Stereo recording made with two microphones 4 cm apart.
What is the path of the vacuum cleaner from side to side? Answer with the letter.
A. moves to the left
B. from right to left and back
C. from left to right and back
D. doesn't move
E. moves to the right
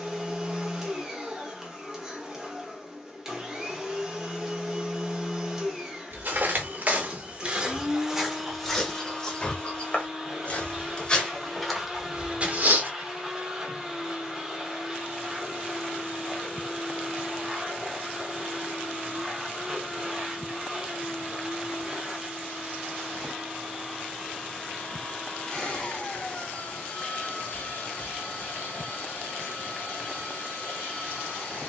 A.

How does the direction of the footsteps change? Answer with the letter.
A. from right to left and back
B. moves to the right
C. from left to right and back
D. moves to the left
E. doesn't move
A.